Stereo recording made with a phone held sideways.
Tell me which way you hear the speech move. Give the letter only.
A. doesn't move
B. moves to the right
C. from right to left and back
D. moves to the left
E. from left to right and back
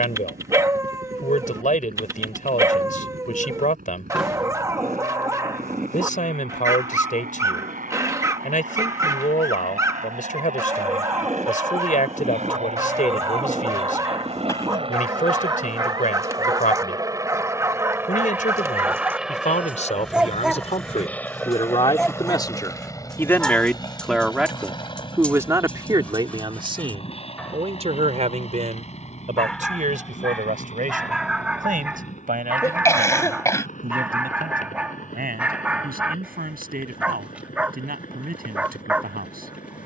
B.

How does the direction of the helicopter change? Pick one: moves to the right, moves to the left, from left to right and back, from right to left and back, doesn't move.
moves to the left.